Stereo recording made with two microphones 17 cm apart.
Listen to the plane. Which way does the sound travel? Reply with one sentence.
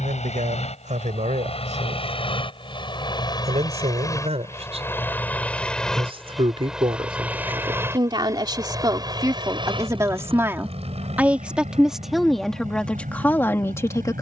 In this clip you hear the plane go from the left side to the right.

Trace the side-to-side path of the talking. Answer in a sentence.
You can hear the talking go from the right side to the left.